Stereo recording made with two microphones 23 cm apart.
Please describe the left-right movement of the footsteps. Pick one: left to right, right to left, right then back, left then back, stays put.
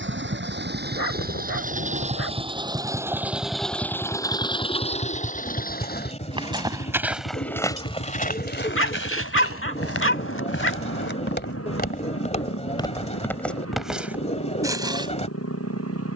left then back.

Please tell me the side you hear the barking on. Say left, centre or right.
left.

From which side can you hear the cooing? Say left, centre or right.
left.